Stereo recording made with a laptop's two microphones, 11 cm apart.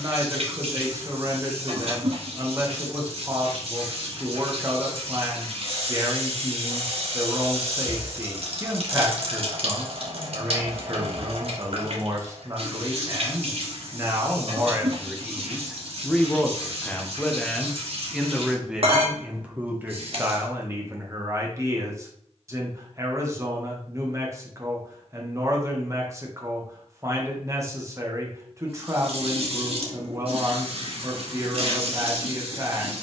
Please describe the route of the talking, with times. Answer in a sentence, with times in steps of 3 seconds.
You can hear the talking on the right from 0 s, in the centre from 15 s and on the right from 21 s.